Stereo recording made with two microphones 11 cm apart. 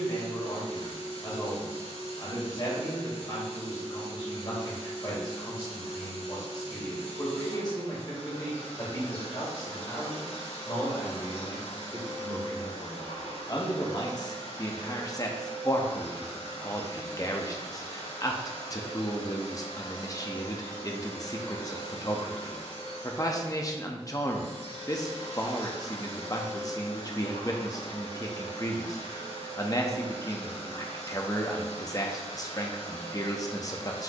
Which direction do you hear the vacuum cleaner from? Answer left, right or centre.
left.